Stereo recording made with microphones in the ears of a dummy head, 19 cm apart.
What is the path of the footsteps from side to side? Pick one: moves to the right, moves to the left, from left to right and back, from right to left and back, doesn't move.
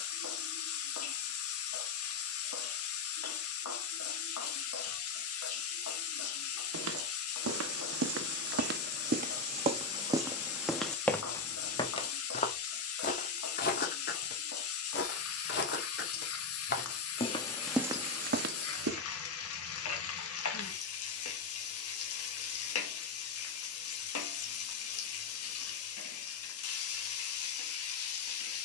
from right to left and back.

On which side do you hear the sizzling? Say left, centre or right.
left.